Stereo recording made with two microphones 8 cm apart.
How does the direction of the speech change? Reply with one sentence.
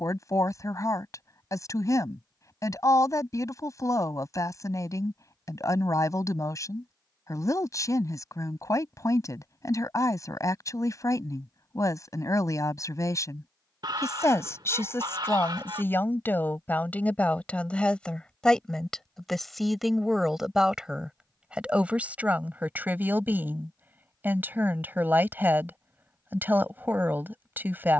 You can hear the speech travel towards the right.